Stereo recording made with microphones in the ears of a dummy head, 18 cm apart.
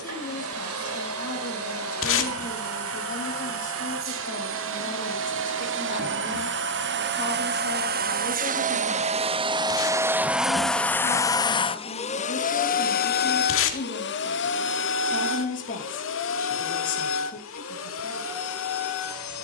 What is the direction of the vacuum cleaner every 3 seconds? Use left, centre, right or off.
right, right, right, centre, left, left, left.